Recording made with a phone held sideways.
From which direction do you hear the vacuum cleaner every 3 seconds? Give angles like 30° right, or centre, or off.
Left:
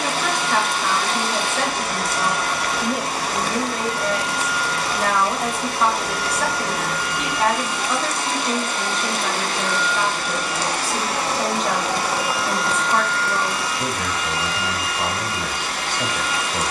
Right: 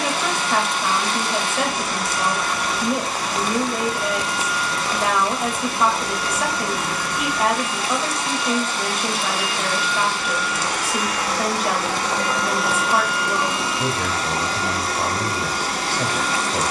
60° left, 60° left, 60° left, 30° left, 20° right, 30° right.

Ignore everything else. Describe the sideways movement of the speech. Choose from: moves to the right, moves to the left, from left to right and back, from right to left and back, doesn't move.
doesn't move.